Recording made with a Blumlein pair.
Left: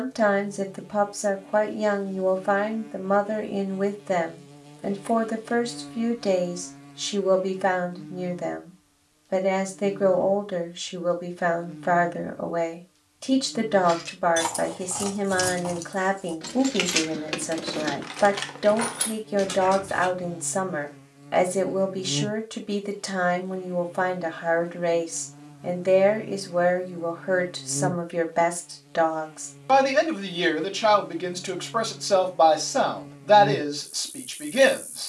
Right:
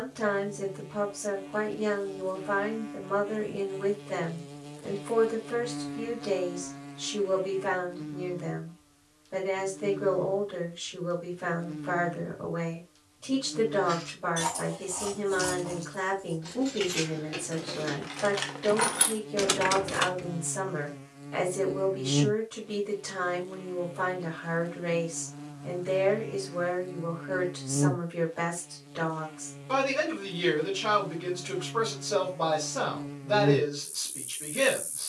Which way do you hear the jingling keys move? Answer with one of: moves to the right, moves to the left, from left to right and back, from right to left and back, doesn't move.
moves to the right.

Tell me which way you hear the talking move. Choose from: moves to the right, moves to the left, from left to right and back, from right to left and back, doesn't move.
doesn't move.